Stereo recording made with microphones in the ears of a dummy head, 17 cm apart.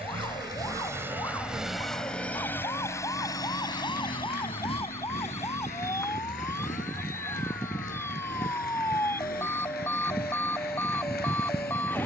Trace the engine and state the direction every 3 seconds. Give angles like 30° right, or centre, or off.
10° right, 30° left, 40° left, 50° left.